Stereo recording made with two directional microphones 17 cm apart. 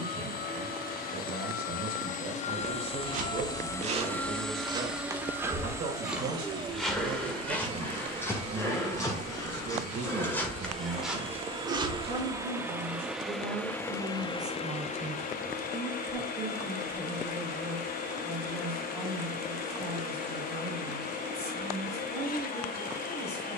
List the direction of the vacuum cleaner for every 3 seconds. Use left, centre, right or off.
left, centre, right, right, centre, left, left, left.